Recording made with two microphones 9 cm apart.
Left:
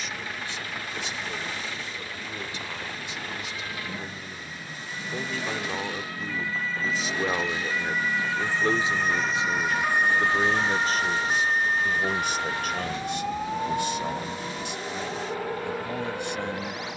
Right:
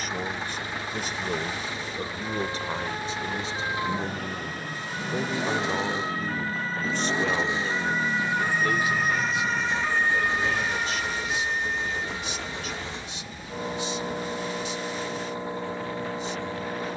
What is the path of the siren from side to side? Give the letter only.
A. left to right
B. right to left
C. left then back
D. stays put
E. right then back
B.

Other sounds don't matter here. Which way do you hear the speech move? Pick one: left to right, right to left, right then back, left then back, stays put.
right to left.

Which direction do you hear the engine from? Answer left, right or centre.
right.